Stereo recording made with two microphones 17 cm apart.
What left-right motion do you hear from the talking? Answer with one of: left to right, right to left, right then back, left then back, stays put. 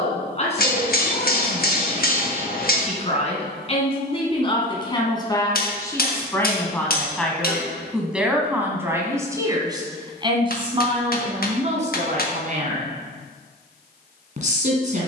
left to right.